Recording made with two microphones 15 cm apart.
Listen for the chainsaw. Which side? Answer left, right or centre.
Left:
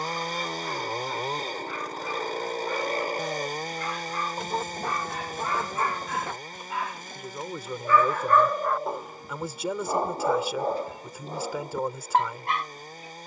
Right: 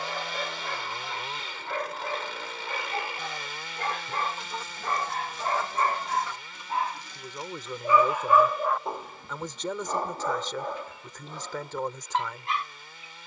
left.